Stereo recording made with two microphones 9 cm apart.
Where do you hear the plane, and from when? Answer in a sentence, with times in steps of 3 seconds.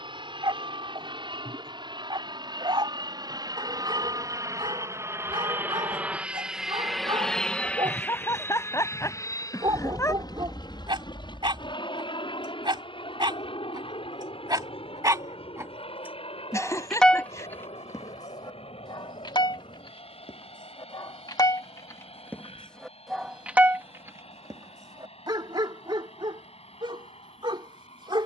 You can hear the plane on the right from 0 s, in the centre from 6 s and on the left from 9 s.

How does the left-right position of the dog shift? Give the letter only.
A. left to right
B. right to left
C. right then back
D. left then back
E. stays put
D.